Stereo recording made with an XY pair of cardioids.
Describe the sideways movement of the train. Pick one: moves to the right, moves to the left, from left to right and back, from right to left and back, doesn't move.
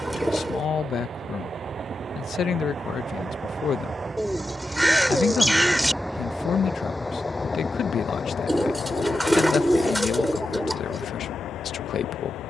moves to the left.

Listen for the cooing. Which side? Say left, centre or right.
centre.